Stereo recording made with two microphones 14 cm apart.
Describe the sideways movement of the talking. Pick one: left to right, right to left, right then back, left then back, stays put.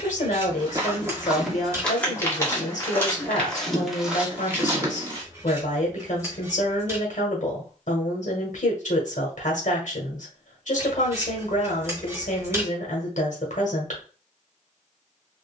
stays put.